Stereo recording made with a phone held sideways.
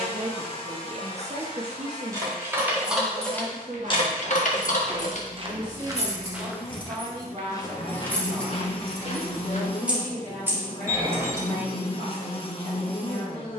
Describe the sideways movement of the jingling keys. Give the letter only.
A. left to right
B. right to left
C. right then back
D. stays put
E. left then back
E.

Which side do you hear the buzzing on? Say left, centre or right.
left.